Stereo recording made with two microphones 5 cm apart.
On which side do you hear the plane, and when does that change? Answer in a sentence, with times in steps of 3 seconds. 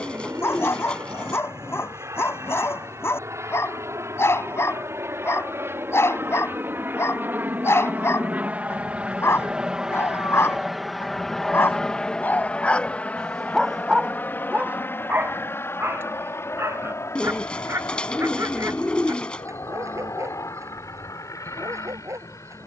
You can hear the plane on the right from 0 s, in the centre from 9 s and on the left from 12 s.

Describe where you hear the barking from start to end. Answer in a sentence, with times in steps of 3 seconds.
In this clip you hear the barking on the left from 0 s, in the centre from 12 s and on the right from 15 s.